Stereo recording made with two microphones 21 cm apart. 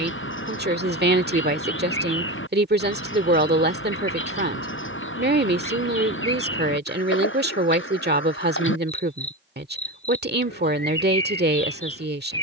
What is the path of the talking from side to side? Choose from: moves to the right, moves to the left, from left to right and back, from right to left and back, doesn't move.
doesn't move.